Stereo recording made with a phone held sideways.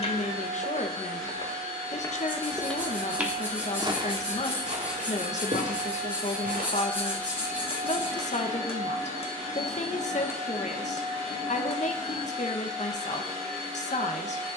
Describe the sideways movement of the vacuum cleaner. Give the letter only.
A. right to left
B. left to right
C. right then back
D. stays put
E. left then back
D.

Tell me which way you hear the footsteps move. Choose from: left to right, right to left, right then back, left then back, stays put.
left to right.